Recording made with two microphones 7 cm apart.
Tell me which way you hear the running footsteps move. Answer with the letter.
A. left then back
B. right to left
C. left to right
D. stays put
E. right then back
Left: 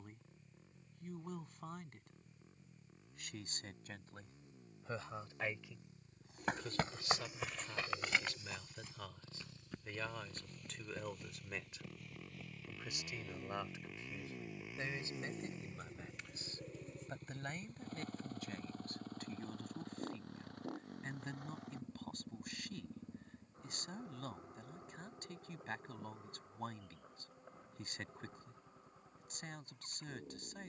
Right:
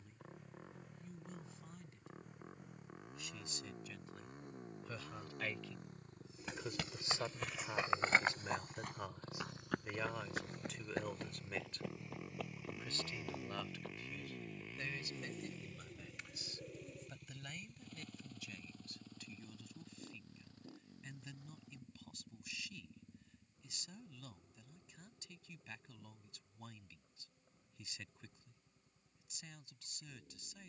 C.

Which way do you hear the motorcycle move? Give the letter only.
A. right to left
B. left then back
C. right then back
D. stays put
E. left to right
A.